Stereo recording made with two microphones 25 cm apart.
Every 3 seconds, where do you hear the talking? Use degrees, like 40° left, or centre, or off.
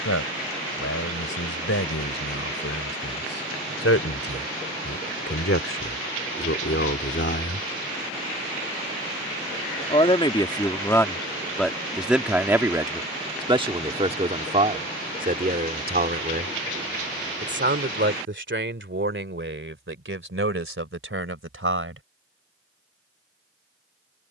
70° left, 60° left, 50° left, 10° left, 20° right, 40° right, 50° right, 60° right.